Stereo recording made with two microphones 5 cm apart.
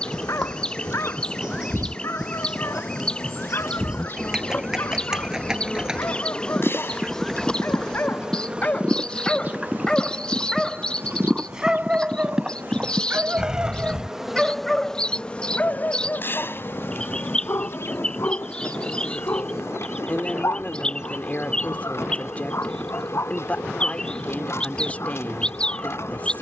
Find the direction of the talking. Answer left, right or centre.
left.